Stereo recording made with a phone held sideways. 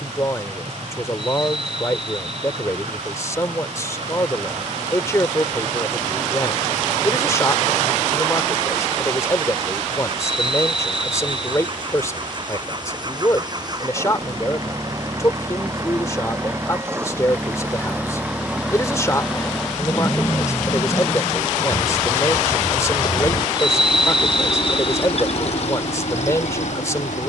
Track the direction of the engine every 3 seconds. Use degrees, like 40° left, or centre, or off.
50° right, 50° right, 40° right, 40° right, 30° right, 20° right, centre, 20° left, 50° left.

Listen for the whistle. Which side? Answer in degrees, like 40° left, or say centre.
centre.